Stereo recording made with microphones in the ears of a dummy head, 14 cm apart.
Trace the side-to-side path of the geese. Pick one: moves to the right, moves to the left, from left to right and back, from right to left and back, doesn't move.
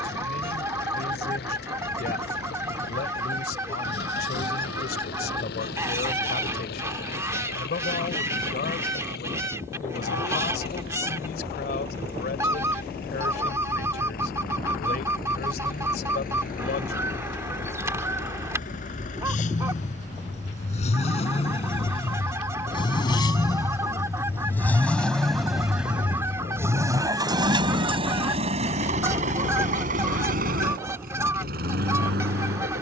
doesn't move.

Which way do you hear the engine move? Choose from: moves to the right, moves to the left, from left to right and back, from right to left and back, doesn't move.
moves to the right.